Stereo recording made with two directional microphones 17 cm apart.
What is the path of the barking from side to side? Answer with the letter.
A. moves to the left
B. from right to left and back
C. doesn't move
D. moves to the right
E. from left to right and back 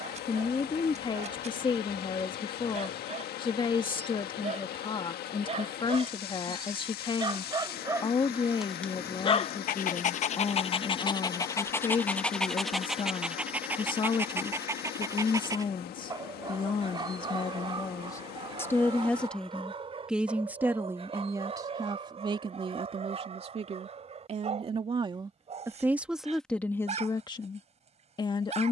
B.